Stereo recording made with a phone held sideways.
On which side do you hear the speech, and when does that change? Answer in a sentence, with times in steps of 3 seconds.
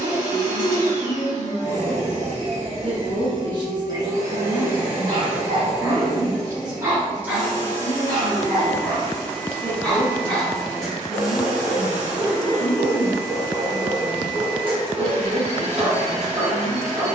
You can hear the speech on the right from 0 s, in the centre from 6 s and on the right from 9 s.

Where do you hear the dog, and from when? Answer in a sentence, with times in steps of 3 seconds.
You can hear the dog on the right from 0 s, in the centre from 6 s and on the right from 15 s.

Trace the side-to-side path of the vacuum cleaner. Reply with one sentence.
You can hear the vacuum cleaner move from right to left and back again.